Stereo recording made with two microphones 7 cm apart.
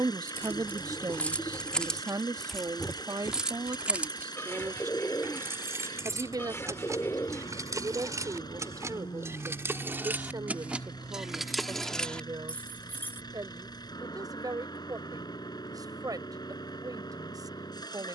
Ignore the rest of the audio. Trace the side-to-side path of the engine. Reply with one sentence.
In this clip you hear the engine stay in one place.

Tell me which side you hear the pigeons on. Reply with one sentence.
You can hear the pigeons on the left.